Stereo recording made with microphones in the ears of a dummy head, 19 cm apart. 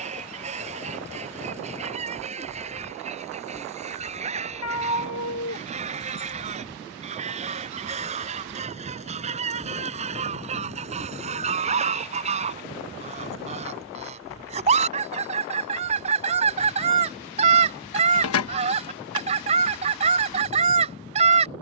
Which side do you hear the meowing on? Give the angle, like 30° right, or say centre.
70° left.